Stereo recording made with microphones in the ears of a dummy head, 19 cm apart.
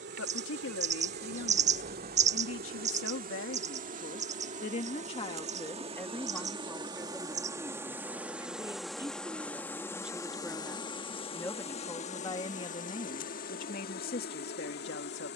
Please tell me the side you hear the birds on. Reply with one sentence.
You can hear the birds on the right.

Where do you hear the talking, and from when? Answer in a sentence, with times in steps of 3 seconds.
In this clip you hear the talking on the left from 0 s, in the centre from 6 s and on the left from 12 s.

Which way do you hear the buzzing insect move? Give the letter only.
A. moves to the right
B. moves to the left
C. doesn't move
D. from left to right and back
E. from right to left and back
B.